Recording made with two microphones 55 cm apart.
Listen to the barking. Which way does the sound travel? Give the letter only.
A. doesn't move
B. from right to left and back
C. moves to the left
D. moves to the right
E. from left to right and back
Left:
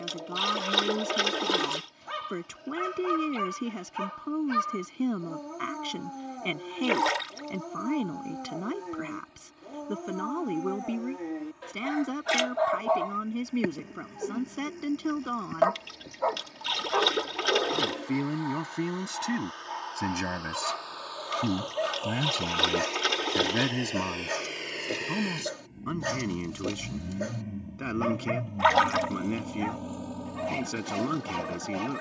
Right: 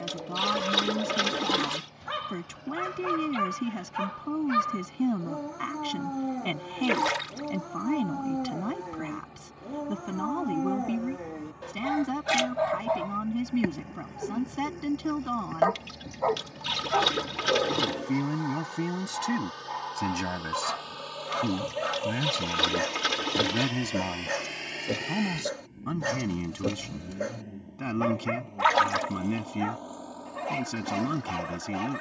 B.